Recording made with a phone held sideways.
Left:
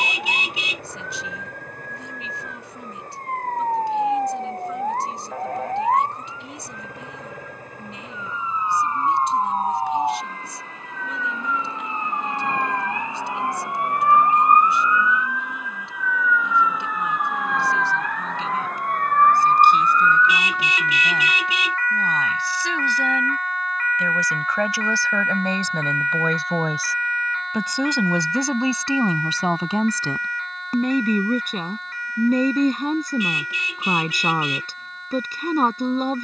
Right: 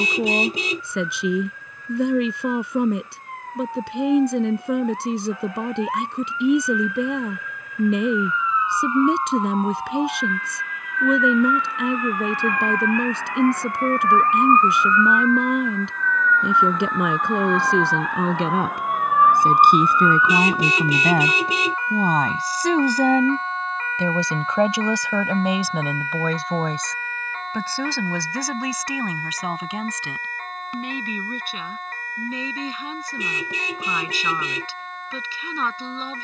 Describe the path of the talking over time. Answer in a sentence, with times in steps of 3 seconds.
In this clip you hear the talking on the right from 0 s, in the centre from 24 s and on the left from 27 s.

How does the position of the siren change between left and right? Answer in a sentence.
You can hear the siren move from left to right.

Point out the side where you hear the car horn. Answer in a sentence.
You can hear the car horn on the right.